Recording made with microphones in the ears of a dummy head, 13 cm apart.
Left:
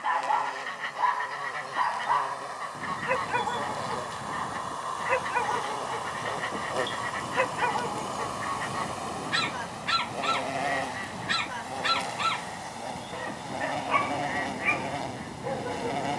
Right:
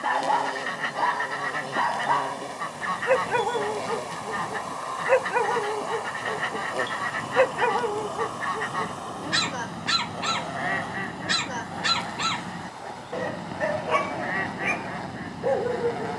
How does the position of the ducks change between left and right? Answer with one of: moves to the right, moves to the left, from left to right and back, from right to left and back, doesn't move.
doesn't move.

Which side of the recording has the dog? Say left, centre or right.
right.